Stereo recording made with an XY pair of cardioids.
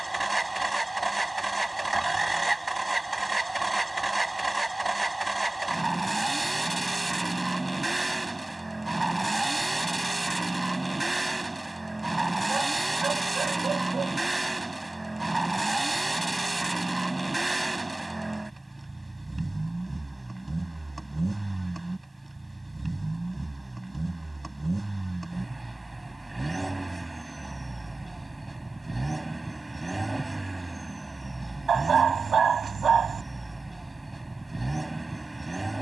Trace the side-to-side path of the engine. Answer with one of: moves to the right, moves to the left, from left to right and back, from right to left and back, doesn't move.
doesn't move.